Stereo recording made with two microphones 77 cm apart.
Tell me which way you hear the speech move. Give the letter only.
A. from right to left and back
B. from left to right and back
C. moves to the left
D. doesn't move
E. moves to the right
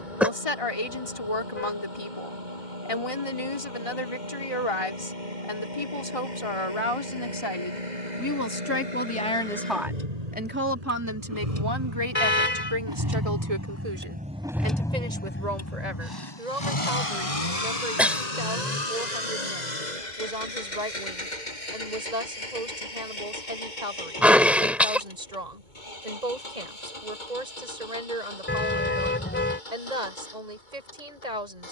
E.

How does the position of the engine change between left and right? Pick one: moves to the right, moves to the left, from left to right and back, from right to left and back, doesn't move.
moves to the left.